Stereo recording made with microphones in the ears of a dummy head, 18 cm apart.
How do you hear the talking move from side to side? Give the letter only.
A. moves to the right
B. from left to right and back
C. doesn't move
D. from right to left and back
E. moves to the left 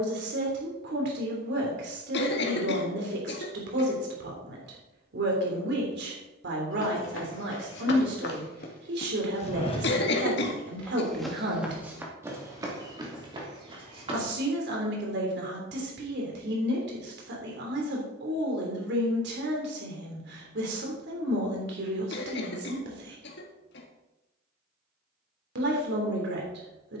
C.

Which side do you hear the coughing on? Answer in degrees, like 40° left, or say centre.
60° left.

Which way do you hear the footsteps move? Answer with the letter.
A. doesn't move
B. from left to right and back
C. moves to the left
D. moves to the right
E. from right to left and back
D.